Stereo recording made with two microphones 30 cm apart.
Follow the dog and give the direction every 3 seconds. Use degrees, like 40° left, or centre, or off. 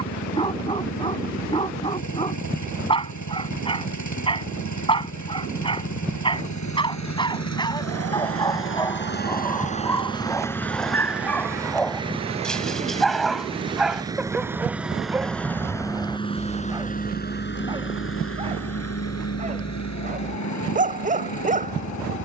20° left, 20° left, 10° left, 10° left, centre, 10° right, 20° right, 30° right.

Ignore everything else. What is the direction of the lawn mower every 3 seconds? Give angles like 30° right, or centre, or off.
70° left, 70° left, 60° left, 10° left, 20° right, 20° left, 60° left, 70° left.